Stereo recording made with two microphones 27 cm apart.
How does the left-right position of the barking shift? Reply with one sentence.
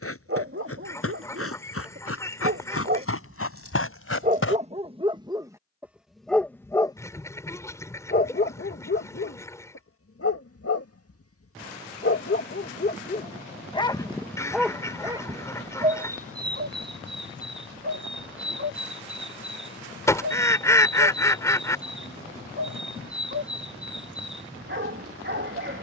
You can hear the barking go left and come back.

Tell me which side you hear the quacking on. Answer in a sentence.
In this clip you hear the quacking in the centre.